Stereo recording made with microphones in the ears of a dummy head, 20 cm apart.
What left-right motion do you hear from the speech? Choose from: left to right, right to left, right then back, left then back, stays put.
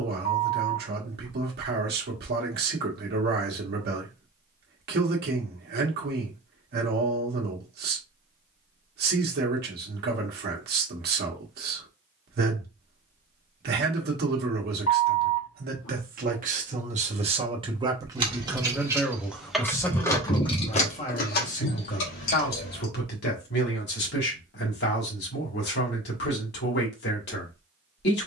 right to left.